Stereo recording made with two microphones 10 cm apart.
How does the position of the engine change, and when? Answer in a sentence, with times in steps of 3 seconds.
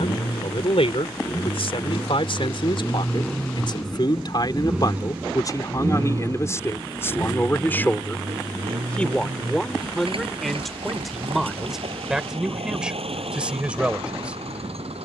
In this clip you hear the engine on the left from 0 s, in the centre from 3 s and on the right from 6 s.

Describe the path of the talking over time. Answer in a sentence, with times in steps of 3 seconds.
You can hear the talking on the left from 0 s and in the centre from 9 s.